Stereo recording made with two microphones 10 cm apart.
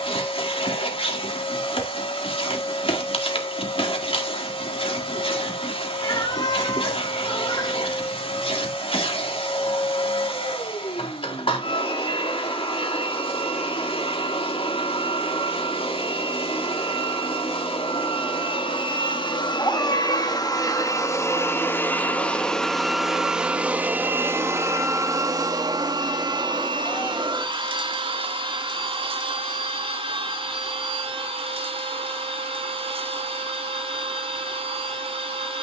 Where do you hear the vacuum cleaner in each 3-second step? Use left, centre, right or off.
left, left, left, left, left, left, left, centre, right, right, right, right.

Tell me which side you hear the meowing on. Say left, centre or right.
left.